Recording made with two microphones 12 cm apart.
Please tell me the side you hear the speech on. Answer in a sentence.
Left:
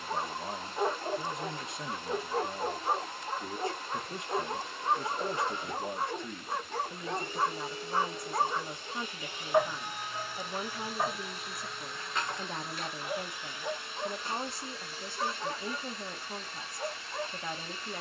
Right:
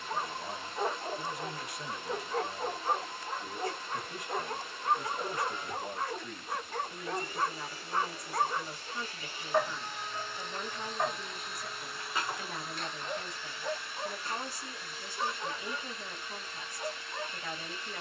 In this clip you hear the speech on the left.